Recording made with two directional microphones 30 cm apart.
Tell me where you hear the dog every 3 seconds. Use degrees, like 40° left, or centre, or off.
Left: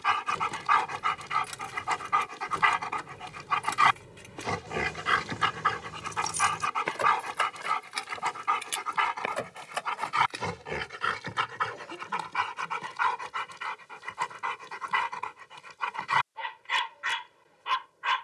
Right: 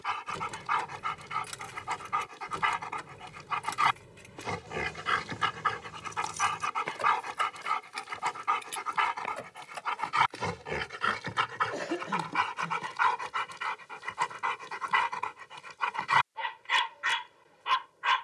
40° left, 30° left, 10° left, centre, 10° right, 10° right.